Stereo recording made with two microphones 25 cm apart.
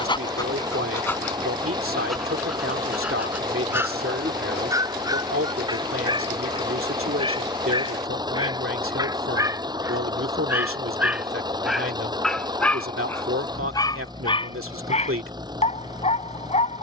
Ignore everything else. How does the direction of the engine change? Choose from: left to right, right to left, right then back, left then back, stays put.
stays put.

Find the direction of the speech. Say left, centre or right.
right.